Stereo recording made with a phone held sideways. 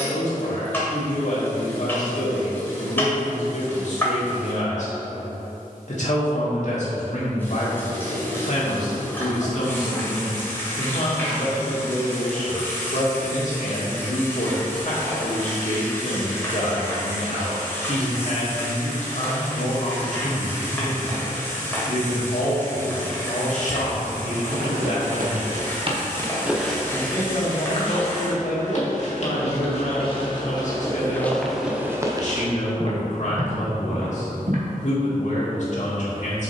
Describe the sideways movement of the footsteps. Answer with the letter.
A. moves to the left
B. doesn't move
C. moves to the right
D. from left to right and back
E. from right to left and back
E.